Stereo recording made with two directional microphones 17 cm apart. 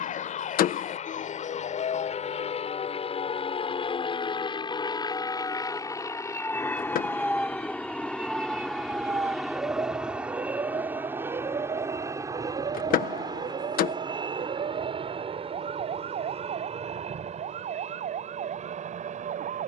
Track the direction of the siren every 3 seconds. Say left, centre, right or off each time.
left, left, centre, right, right, right, right.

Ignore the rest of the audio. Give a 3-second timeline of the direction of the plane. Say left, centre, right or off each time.
left, left, centre, centre, right, right, right.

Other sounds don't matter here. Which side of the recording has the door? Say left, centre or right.
left.